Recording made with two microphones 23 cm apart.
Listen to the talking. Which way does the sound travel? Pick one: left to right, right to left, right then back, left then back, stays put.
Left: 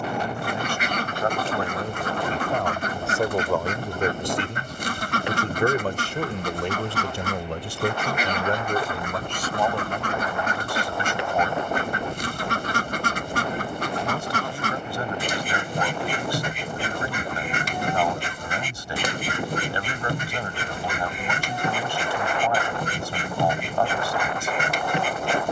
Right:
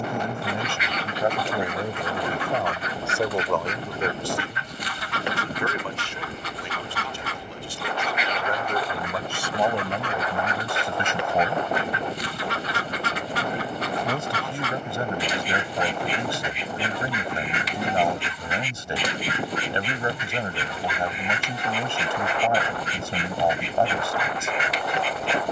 left then back.